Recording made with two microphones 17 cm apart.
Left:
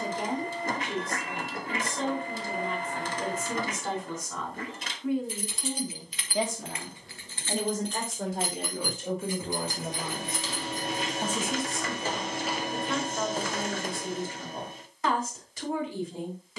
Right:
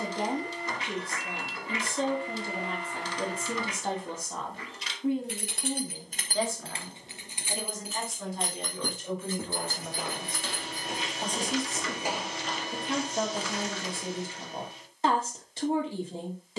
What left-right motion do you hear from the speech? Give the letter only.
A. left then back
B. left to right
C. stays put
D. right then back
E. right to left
A.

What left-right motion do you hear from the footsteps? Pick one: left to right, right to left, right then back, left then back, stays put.
right to left.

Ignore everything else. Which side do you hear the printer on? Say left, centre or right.
left.